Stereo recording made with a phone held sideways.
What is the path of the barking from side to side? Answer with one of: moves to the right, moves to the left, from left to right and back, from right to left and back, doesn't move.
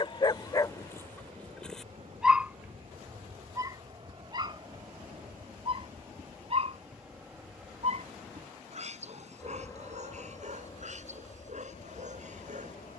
moves to the right.